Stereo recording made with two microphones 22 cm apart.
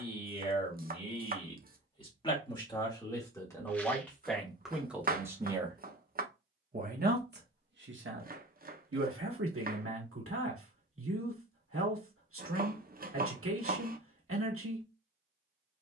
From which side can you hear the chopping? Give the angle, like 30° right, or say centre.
40° right.